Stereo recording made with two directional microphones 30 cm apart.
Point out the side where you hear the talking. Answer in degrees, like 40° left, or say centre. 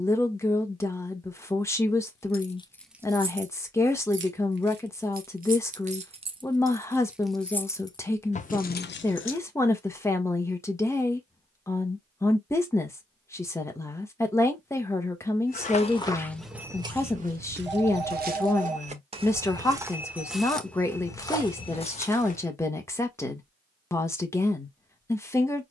10° left.